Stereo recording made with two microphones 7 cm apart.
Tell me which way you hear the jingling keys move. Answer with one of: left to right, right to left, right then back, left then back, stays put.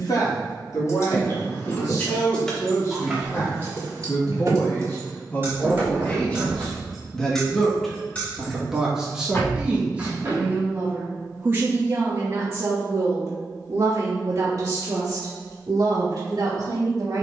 right then back.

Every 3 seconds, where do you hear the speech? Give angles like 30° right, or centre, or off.
50° left, 30° left, 10° left, 20° right, 40° right, 60° right.